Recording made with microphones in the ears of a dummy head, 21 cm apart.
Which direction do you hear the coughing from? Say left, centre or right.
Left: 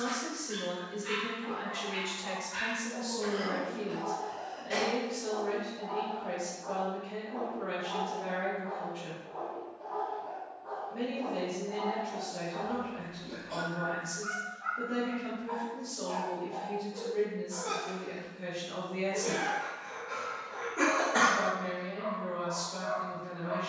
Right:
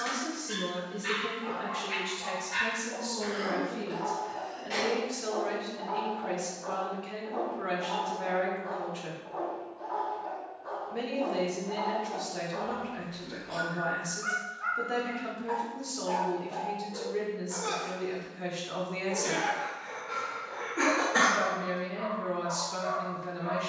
centre.